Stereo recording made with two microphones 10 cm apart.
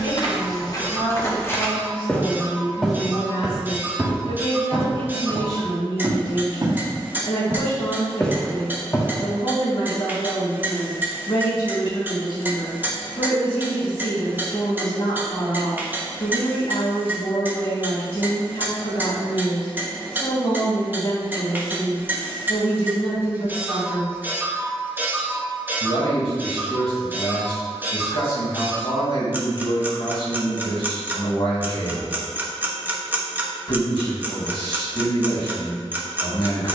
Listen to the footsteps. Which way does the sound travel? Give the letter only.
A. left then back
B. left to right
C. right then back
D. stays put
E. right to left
C.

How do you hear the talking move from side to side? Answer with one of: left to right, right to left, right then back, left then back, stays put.
stays put.